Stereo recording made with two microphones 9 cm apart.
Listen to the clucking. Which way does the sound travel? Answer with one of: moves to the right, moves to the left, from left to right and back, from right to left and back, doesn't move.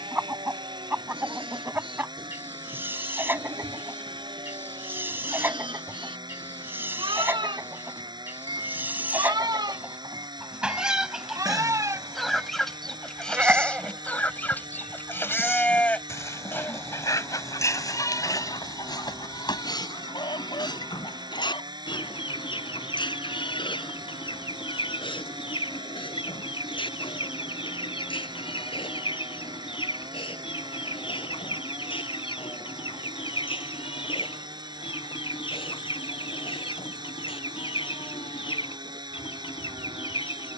moves to the left.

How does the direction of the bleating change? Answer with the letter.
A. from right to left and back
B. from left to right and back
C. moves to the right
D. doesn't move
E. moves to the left
E.